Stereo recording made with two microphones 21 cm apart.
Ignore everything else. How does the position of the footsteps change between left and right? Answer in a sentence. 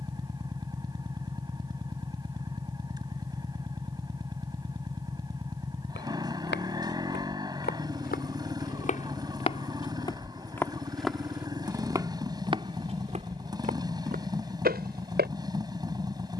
In this clip you hear the footsteps go from the left side to the right.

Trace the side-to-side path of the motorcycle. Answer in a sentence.
You can hear the motorcycle stay in one place.